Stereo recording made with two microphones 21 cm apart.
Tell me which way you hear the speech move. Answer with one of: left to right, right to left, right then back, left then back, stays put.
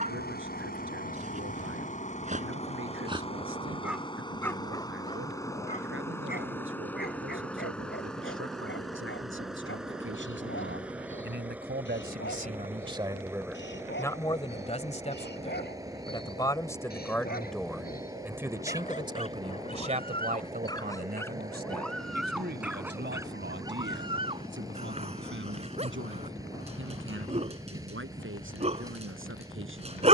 left then back.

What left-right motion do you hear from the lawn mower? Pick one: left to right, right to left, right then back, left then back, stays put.
left to right.